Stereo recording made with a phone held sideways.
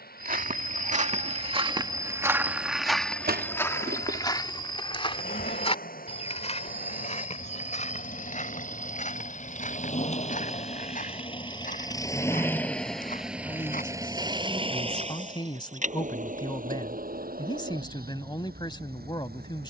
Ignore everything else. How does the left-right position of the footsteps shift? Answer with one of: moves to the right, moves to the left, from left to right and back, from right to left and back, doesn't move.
moves to the left.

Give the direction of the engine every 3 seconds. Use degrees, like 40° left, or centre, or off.
70° left, 70° left, 60° left, 40° left, 10° right, 60° right, 70° right.